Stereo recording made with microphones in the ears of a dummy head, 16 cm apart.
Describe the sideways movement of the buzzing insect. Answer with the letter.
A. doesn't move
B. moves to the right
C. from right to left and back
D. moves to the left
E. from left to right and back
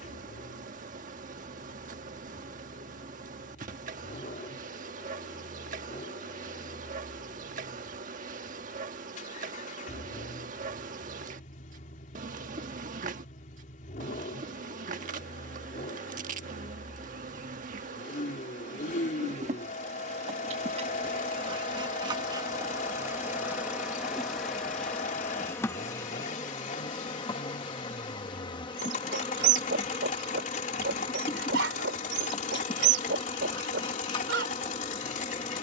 D.